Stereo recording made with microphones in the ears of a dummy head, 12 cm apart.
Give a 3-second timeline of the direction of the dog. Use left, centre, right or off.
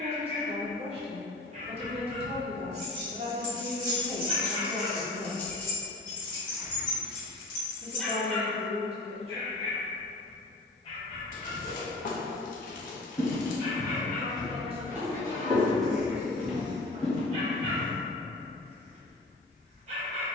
right, right, centre, left, left, right, right.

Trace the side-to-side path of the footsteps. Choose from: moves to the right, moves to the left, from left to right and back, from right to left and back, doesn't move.
from left to right and back.